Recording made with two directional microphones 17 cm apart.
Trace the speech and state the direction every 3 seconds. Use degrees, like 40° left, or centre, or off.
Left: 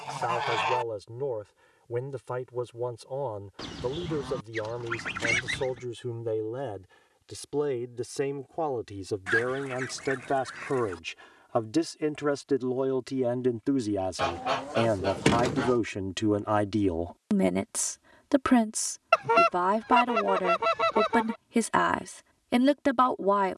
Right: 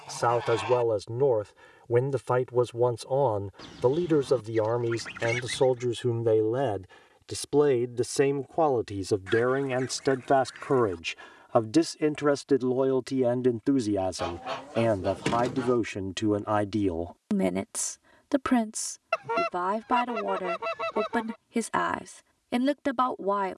50° right, 50° right, 40° right, 30° right, 20° right, centre, 20° left, 20° left.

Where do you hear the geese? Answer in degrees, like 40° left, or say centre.
30° left.